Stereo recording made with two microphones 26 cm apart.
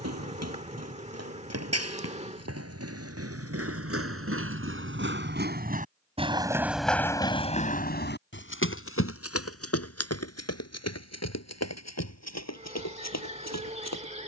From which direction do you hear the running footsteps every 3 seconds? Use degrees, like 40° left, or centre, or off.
70° right, 50° right, 20° left, 70° left, 80° left.